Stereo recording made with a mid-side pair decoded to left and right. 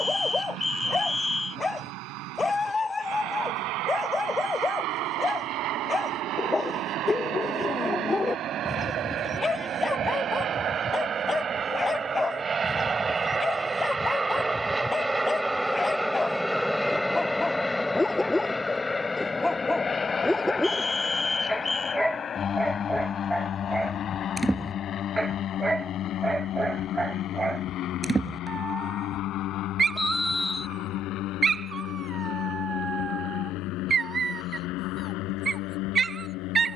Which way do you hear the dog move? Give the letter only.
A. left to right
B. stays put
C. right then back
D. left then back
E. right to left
A.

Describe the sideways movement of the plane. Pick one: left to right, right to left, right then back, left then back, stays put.
right to left.